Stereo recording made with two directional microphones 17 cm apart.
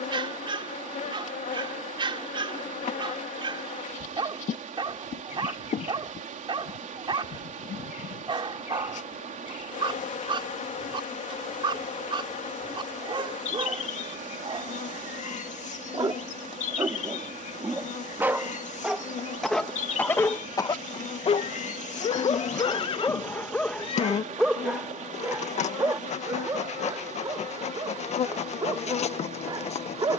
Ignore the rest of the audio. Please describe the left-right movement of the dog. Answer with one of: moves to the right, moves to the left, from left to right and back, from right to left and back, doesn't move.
from right to left and back.